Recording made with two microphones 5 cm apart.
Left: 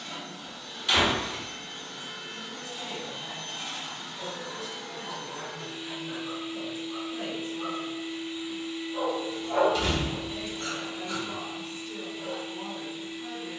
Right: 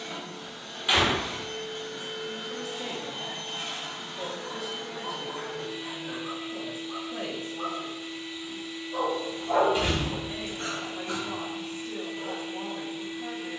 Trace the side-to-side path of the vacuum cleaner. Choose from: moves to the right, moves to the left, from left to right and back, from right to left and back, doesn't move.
from right to left and back.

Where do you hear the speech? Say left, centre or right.
right.